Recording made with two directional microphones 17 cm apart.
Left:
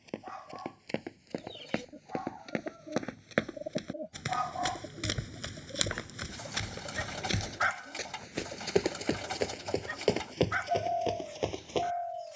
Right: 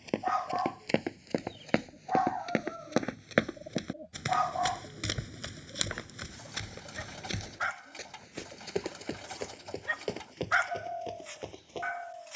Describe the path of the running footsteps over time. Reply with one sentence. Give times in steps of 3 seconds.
You can hear the running footsteps on the right from 0 s, in the centre from 3 s and on the left from 6 s.